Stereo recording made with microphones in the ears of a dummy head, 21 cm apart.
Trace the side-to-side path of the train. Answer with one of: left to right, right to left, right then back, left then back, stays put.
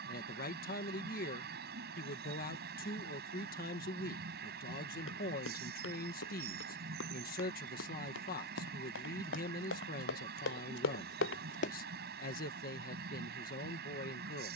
stays put.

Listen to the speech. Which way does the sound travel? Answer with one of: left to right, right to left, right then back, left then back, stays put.
stays put.